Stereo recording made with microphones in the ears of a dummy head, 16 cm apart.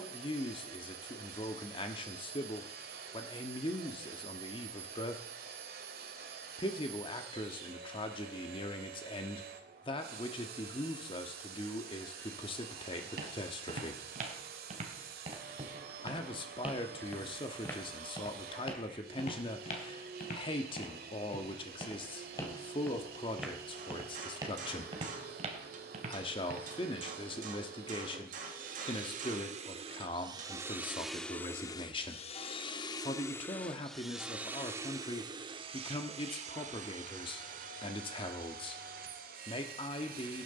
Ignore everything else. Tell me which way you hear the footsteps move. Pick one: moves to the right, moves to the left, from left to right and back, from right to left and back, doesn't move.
from right to left and back.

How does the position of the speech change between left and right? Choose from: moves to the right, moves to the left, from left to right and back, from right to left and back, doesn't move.
doesn't move.